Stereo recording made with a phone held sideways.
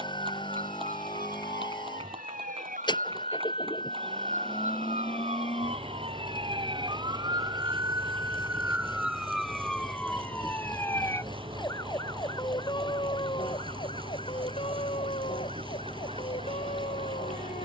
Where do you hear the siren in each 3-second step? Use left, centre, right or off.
right, right, right, centre, left, left.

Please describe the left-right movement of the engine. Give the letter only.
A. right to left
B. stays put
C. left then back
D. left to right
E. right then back
B.